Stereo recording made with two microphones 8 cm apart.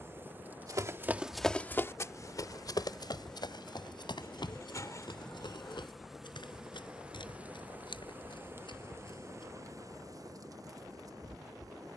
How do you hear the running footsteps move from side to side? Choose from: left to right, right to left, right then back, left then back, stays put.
right to left.